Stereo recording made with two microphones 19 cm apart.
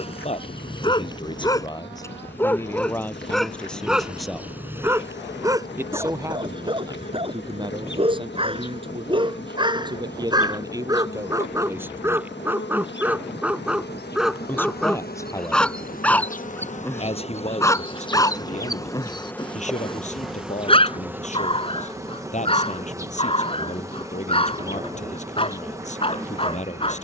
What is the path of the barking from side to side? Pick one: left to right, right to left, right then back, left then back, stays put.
right then back.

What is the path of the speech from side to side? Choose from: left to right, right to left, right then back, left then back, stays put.
right then back.